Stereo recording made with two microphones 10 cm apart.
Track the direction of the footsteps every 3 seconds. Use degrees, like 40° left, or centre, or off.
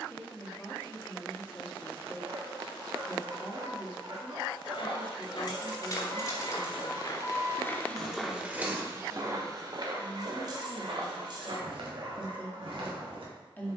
off, 70° left, 20° left, 60° right, 70° right.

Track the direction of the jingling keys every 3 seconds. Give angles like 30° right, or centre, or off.
off, 50° left, 10° left, 40° right, off.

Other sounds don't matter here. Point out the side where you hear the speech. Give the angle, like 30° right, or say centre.
20° left.